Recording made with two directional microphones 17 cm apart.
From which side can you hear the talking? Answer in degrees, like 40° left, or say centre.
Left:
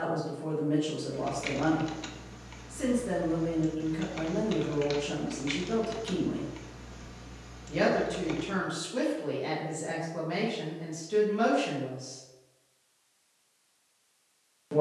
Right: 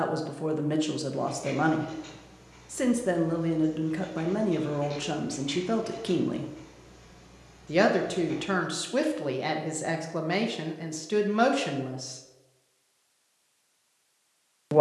50° right.